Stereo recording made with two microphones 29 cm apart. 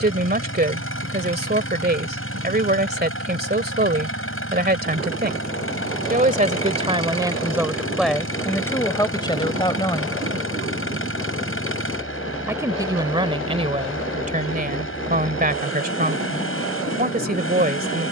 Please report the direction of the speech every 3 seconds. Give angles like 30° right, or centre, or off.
30° right, 30° right, 10° right, 20° left, 20° right, 30° right.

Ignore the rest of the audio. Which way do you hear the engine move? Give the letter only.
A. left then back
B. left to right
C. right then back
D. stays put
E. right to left
D.